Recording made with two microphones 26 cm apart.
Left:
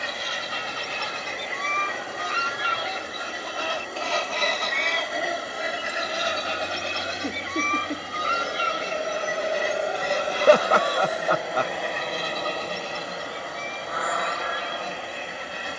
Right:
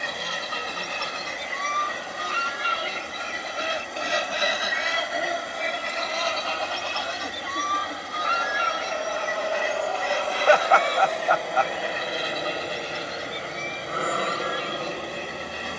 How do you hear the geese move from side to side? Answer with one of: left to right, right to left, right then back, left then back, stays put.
right to left.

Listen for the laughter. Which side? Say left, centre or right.
left.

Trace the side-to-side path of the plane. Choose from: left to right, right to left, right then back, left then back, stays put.
left to right.